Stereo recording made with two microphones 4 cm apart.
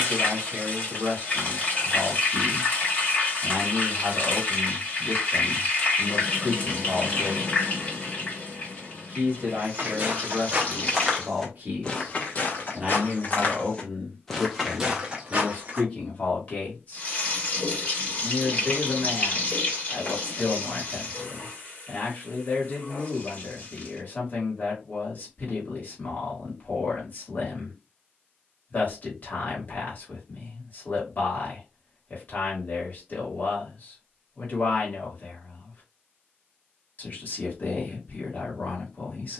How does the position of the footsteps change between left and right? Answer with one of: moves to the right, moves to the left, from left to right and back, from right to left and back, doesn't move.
from right to left and back.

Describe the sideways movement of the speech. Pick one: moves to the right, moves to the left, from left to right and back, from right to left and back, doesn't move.
moves to the left.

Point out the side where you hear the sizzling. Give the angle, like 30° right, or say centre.
30° left.